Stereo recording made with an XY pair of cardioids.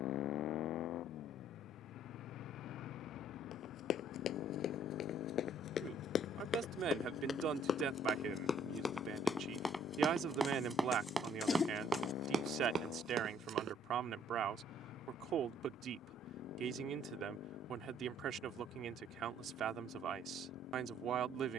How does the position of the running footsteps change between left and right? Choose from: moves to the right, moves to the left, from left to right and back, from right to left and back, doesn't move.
moves to the right.